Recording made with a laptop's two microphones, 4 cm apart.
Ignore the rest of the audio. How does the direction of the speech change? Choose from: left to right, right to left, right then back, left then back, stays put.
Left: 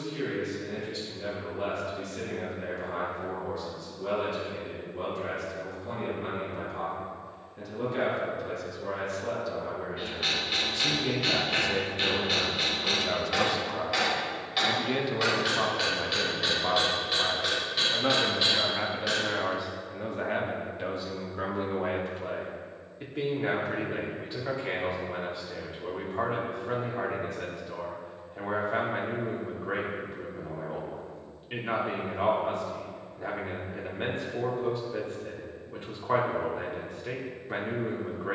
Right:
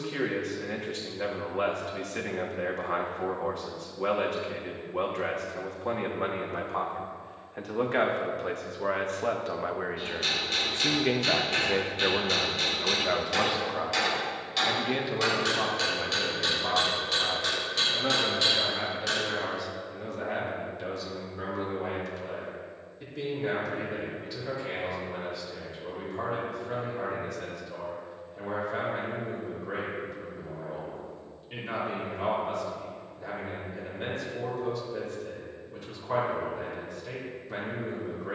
right to left.